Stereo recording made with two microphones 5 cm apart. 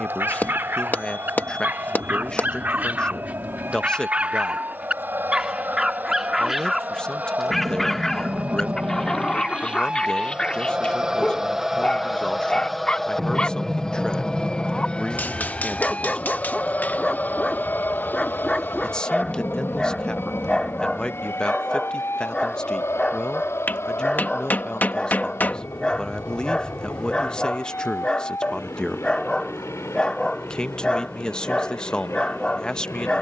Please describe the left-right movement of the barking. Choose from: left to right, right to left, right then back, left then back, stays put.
right to left.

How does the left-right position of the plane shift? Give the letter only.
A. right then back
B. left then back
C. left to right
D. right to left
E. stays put
D.